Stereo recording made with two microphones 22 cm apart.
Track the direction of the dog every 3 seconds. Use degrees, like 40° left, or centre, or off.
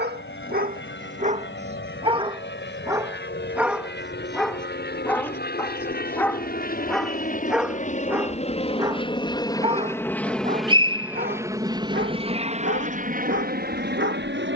30° right, centre, centre, 40° right, 60° right.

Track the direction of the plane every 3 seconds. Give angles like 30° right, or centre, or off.
60° left, 60° left, 40° left, centre, 40° right.